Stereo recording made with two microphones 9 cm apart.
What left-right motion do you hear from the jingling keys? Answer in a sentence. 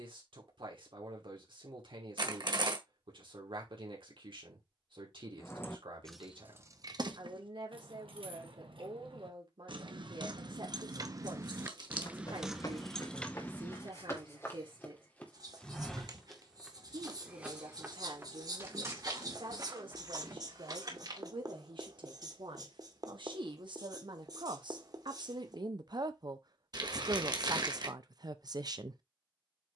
In this clip you hear the jingling keys go right and come back.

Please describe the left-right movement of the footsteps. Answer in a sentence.
You can hear the footsteps move from left to right.